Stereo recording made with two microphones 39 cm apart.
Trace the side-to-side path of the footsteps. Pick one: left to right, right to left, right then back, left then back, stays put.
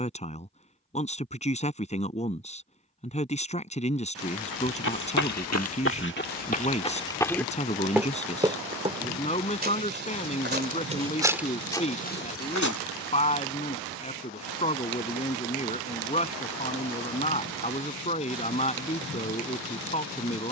right then back.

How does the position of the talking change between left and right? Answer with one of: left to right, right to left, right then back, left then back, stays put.
stays put.